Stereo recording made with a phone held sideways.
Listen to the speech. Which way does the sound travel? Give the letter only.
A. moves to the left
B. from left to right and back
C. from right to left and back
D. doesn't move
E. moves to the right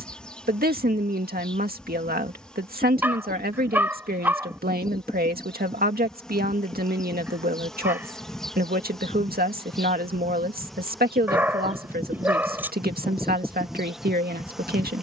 D.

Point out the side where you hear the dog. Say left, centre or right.
centre.